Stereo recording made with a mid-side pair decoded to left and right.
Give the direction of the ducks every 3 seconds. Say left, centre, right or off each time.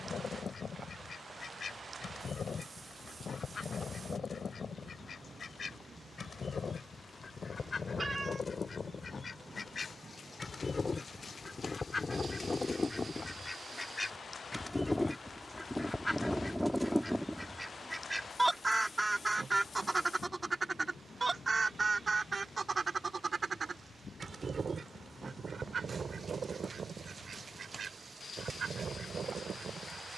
left, left, left, left, left, centre, right, right, right, right.